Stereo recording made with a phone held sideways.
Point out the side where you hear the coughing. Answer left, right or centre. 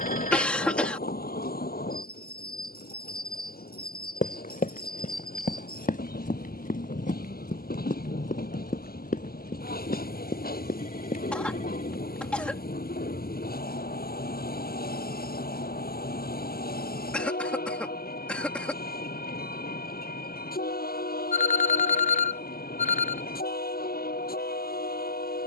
centre.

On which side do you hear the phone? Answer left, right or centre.
left.